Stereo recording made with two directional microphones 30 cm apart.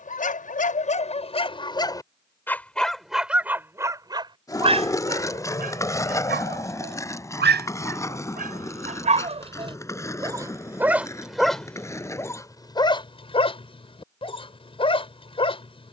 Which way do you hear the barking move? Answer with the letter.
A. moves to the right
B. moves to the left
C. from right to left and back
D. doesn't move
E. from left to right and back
E.